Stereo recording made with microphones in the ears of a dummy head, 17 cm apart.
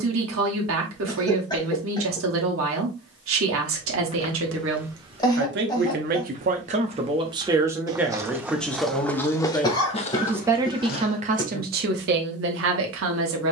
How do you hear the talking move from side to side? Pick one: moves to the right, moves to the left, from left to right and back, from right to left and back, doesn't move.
from right to left and back.